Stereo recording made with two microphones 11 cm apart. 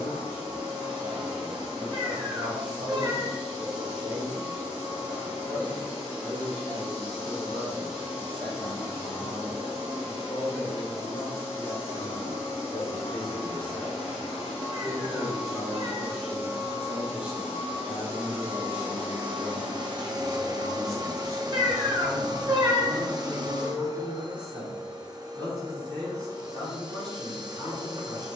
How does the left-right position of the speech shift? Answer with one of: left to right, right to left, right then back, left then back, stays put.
left then back.